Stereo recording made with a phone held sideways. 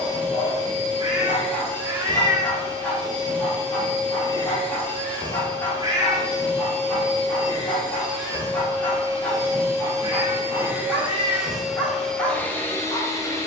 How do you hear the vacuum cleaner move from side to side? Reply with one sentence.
You can hear the vacuum cleaner travel towards the left.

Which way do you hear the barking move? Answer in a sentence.
In this clip you hear the barking stay in one place.